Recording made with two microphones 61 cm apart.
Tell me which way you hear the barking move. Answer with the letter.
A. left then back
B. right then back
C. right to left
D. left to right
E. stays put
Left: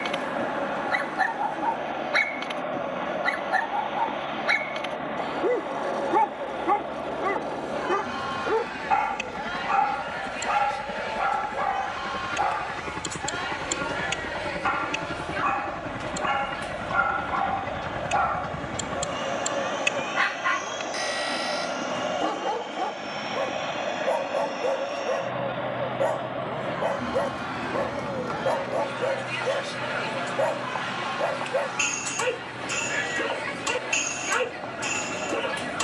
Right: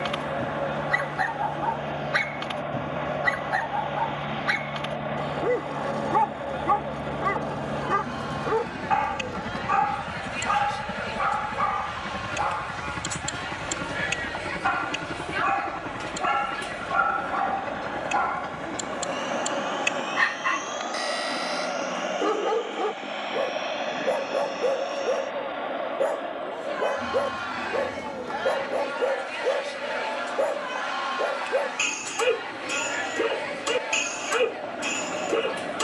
C.